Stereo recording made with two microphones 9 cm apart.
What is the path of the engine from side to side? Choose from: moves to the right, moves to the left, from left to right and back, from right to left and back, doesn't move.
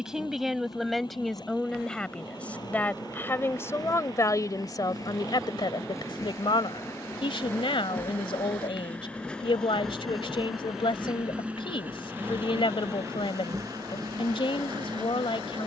moves to the right.